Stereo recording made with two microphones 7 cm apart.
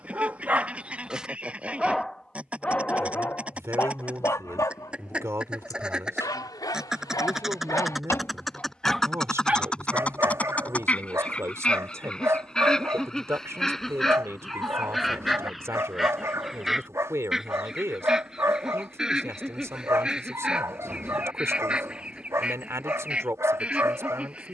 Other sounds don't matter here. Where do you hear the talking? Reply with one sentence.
You can hear the talking on the right.